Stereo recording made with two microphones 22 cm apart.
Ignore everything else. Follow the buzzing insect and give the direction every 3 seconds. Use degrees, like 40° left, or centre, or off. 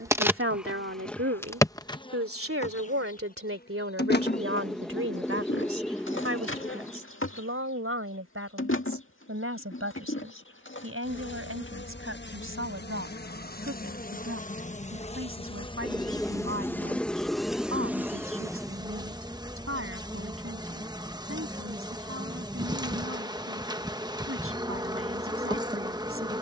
10° left, 50° left, 70° left, 60° left, 40° left, 10° left, 20° right, 20° right, 20° right.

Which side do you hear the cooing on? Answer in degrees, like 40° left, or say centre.
centre.